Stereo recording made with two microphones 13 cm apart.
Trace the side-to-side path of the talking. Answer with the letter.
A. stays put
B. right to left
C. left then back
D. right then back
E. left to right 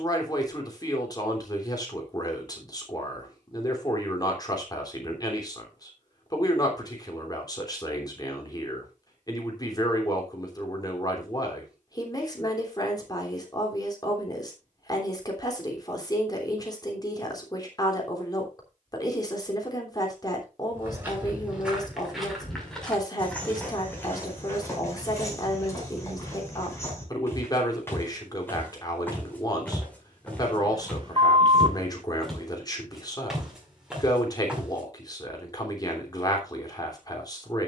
A.